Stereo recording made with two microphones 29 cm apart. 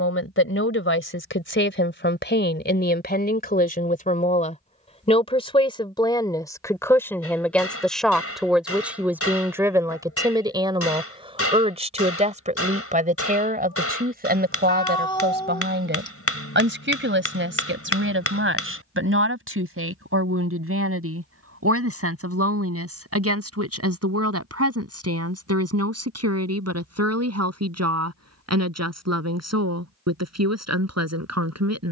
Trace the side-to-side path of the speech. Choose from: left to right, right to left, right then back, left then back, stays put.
left to right.